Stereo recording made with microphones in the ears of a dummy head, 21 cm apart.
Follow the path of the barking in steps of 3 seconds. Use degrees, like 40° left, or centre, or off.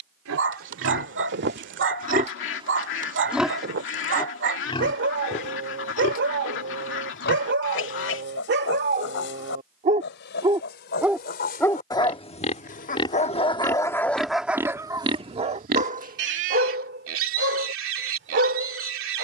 50° right, 50° right, 50° right, 20° right, 20° left, 40° right, 50° right.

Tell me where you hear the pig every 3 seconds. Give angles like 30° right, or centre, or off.
40° right, 10° left, 50° left, 40° left, 10° left, 50° right, 60° right.